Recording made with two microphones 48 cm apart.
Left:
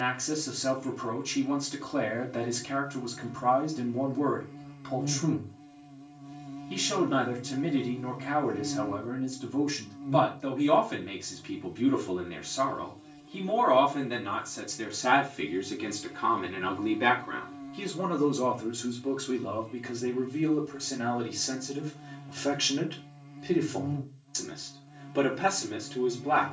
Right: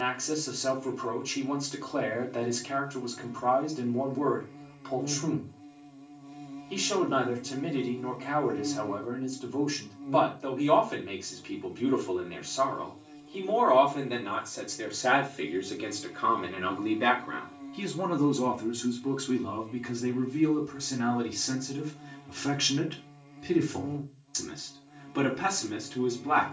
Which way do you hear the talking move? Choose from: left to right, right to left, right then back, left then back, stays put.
left to right.